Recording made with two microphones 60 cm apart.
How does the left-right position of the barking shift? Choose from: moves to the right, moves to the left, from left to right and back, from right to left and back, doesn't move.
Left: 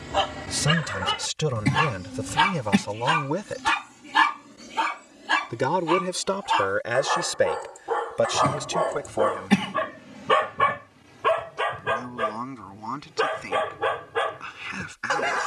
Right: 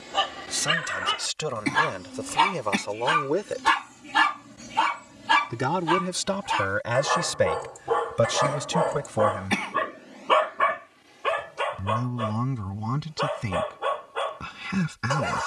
from left to right and back.